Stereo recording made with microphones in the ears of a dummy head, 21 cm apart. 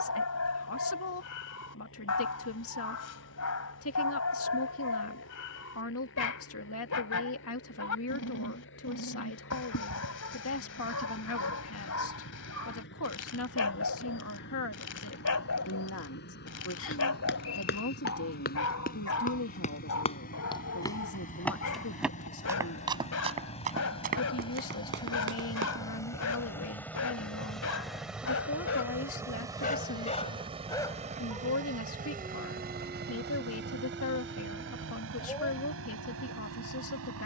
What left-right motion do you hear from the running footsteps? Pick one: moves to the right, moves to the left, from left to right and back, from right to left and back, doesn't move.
moves to the right.